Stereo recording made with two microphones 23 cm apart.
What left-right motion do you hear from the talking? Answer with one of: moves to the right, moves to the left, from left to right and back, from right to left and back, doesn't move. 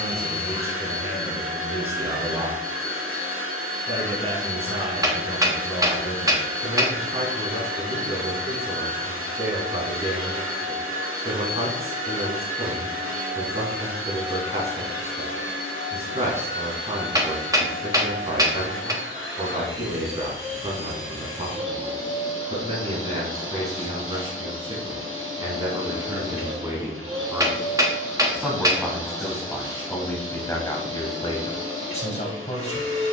moves to the left.